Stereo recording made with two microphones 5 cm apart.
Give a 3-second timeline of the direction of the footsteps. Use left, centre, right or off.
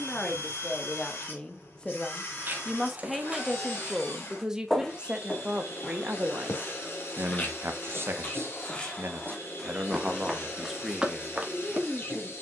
right, centre, left, centre.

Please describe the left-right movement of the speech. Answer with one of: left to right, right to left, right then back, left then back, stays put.
right then back.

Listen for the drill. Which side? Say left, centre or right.
left.